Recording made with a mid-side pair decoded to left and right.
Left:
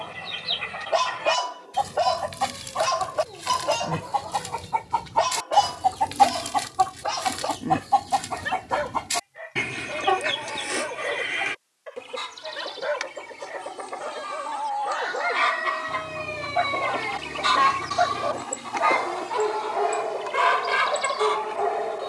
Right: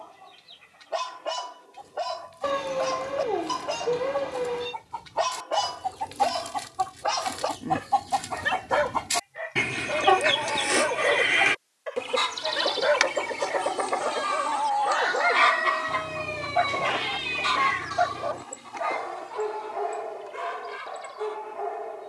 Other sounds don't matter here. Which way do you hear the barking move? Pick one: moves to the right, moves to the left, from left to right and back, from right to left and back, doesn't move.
from left to right and back.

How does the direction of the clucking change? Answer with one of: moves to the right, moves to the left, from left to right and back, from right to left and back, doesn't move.
from left to right and back.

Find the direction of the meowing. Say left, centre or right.
right.